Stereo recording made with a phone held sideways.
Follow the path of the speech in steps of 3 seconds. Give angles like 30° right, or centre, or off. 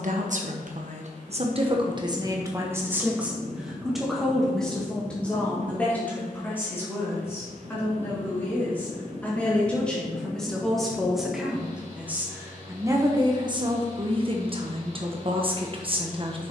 40° right, centre, 10° left, centre, 30° right, 40° right.